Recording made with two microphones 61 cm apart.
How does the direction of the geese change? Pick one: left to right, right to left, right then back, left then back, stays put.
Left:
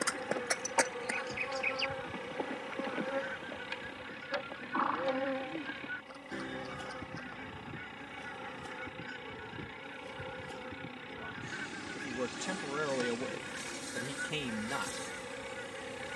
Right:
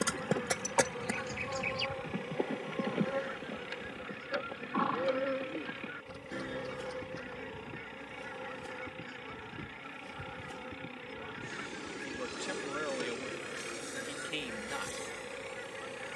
stays put.